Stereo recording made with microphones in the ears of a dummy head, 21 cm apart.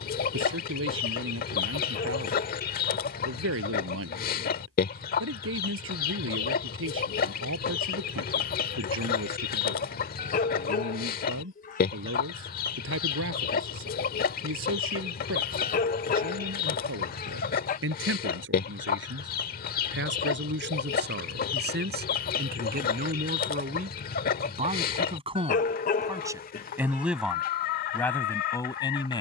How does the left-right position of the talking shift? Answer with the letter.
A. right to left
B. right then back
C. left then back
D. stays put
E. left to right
A.